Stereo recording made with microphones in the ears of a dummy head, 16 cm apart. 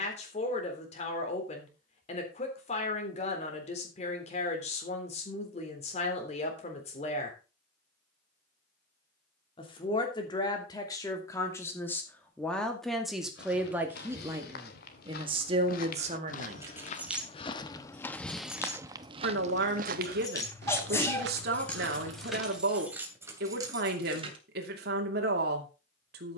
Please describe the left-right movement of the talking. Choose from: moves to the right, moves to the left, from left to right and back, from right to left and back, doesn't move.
moves to the right.